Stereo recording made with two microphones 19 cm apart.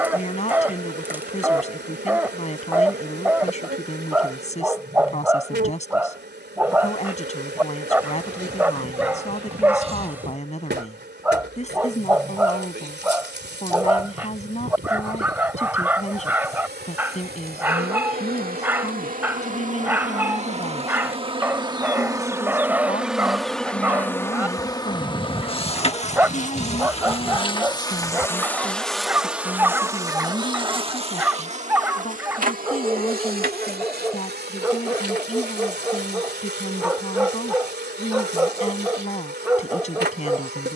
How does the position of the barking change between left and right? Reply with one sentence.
In this clip you hear the barking stay in one place.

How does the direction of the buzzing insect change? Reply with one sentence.
You can hear the buzzing insect move from right to left and back again.